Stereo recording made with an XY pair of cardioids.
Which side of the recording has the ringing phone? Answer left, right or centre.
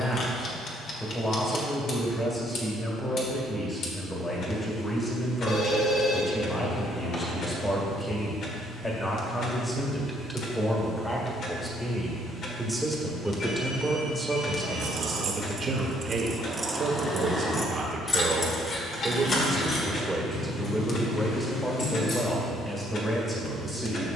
left.